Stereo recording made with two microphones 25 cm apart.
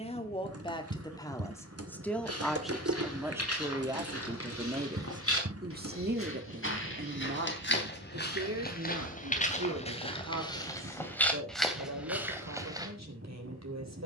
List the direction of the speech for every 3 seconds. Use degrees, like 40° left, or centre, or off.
10° left, 20° right, 50° right, 70° right, 70° right.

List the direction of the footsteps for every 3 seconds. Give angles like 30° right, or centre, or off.
70° left, 60° left, 40° left, 20° left, 10° right.